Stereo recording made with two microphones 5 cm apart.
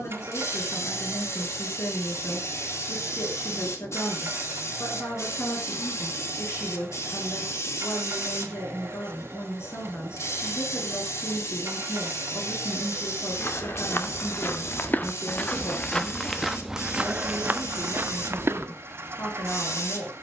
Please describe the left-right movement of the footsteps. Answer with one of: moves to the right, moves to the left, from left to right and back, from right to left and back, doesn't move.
moves to the right.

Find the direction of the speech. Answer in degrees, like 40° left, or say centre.
60° left.